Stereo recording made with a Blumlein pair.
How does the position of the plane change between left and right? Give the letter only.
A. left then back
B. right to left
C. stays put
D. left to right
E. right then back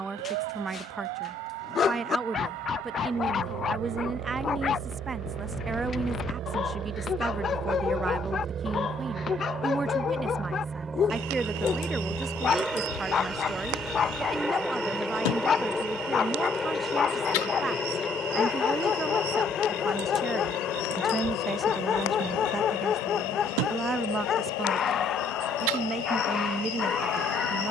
B.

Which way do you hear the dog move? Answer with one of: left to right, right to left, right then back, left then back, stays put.
stays put.